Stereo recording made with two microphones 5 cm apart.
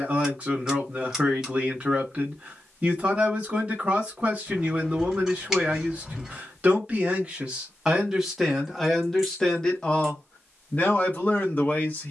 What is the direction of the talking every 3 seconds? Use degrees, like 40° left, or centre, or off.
30° right, 30° right, 10° right, 20° left.